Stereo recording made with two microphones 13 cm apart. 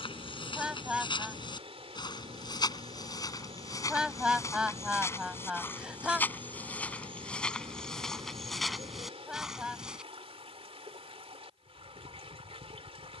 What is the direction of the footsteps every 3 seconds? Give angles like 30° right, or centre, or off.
40° left, 20° left, 10° left, 10° right, off.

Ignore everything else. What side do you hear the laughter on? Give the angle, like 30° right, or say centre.
10° right.